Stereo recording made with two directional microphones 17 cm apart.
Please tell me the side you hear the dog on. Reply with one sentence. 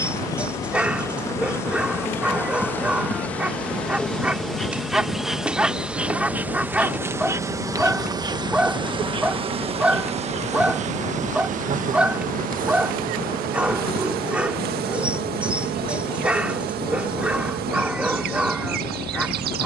In this clip you hear the dog in the centre.